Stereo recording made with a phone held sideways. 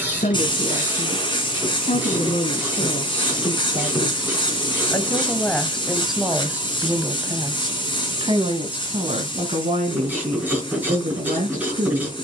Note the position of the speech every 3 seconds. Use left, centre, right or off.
left, left, right, right.